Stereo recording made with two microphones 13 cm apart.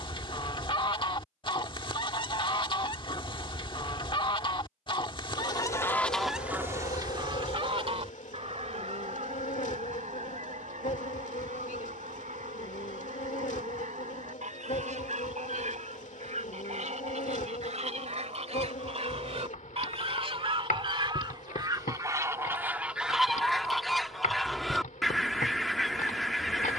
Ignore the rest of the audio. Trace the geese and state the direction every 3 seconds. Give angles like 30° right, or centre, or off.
40° left, 40° left, 40° right, 70° right, 70° right, 70° right, 50° right, 20° right, centre.